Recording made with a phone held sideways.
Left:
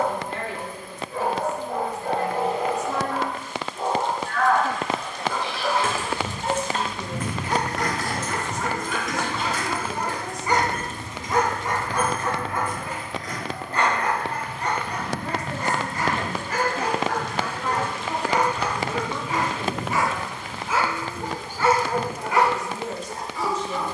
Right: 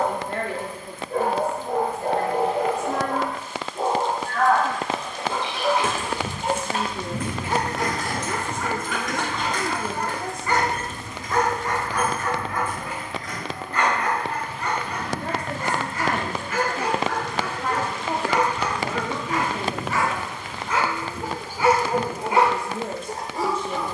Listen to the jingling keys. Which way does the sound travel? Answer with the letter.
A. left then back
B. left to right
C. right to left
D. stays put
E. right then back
C.